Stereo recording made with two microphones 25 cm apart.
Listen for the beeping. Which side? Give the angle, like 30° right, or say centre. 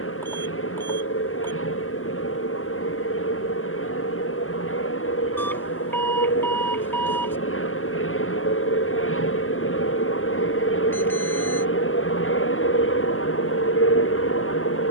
10° left.